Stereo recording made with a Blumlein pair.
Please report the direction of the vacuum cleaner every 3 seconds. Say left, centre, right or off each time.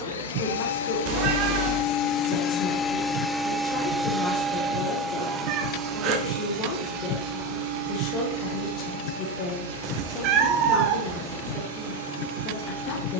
left, centre, right, right, right.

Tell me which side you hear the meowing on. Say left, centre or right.
right.